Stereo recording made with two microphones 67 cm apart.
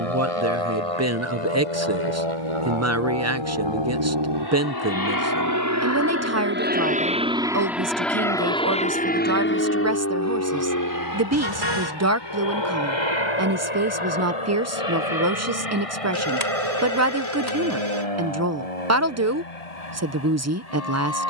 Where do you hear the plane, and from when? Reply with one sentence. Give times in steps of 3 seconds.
You can hear the plane on the right from 0 s, in the centre from 6 s and on the left from 9 s.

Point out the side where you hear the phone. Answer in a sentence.
You can hear the phone on the right.